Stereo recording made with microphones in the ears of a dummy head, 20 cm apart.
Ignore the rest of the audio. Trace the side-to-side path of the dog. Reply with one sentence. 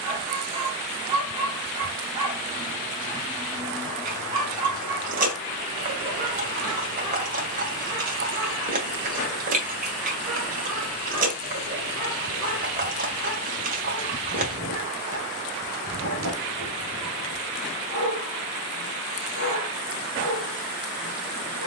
In this clip you hear the dog go from the right side to the left.